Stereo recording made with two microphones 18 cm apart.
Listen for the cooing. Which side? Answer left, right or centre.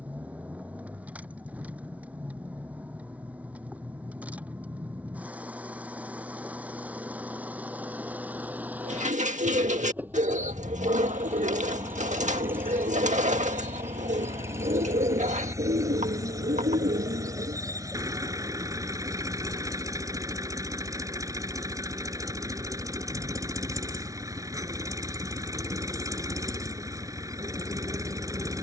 right.